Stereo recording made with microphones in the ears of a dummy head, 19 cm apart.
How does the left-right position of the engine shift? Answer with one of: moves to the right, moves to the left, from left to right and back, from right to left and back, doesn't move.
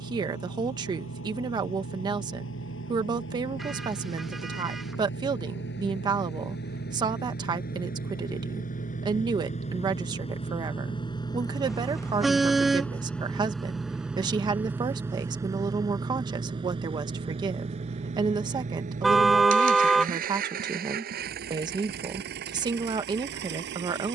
moves to the right.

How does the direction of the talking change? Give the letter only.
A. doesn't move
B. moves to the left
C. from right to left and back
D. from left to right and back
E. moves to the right
A.